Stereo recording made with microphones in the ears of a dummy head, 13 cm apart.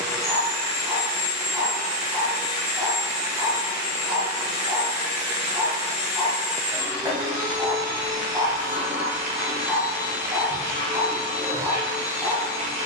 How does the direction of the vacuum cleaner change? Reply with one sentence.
In this clip you hear the vacuum cleaner stay put.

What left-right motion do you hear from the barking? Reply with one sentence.
In this clip you hear the barking stay in one place.